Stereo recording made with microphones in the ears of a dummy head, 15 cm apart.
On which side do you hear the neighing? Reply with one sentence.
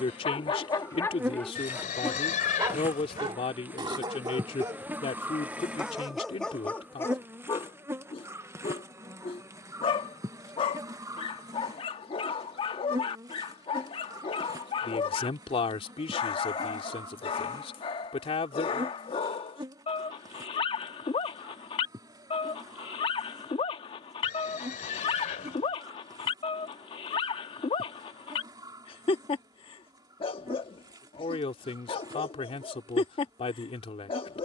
You can hear the neighing on the left.